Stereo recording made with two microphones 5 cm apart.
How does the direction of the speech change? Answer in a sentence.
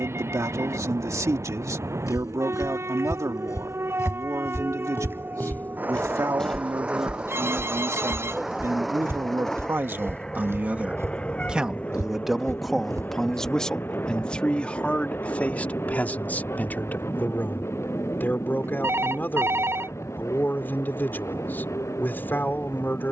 You can hear the speech go from the right side to the left.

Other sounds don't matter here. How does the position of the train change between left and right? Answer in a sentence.
You can hear the train move from right to left.